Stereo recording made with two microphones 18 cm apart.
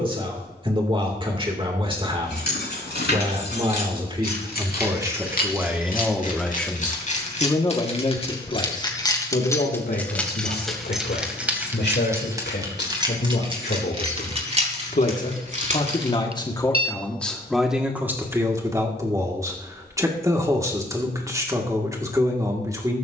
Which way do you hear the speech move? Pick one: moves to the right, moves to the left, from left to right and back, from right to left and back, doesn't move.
from right to left and back.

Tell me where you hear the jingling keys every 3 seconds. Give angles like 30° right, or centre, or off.
70° left, 60° left, 40° left, centre, 30° right, 40° right, off, off.